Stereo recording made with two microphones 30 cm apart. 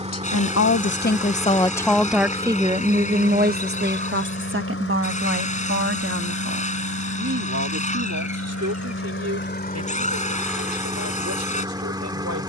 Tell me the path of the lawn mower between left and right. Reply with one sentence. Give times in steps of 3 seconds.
In this clip you hear the lawn mower in the centre from 0 s, on the left from 3 s and in the centre from 9 s.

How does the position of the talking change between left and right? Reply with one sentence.
You can hear the talking move from left to right.